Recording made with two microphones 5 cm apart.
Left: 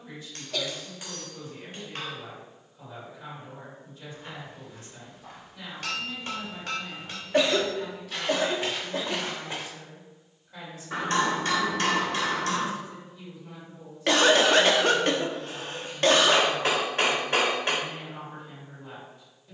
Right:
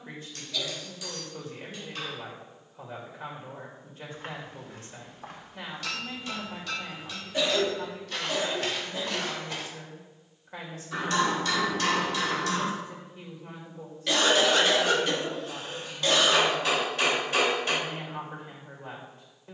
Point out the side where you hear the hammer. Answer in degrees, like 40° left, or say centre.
40° left.